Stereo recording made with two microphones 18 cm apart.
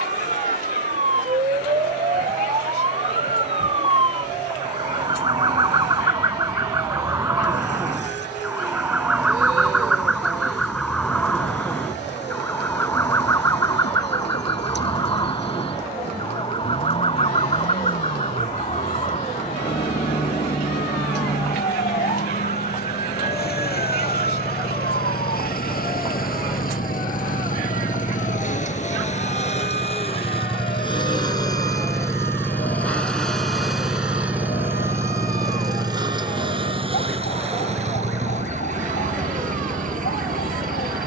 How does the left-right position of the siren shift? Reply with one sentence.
In this clip you hear the siren move from right to left.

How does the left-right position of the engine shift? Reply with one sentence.
In this clip you hear the engine move to the right.